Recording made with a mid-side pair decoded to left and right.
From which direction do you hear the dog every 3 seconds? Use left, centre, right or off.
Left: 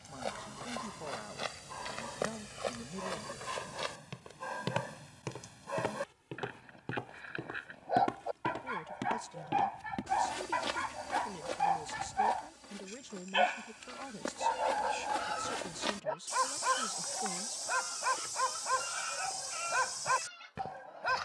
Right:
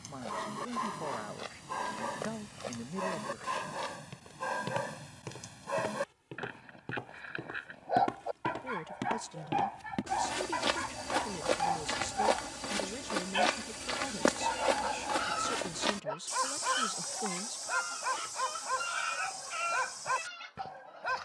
right, right, centre, centre, centre, centre, centre.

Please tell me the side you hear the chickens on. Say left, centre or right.
right.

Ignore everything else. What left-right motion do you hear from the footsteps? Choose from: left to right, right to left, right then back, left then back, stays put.
right then back.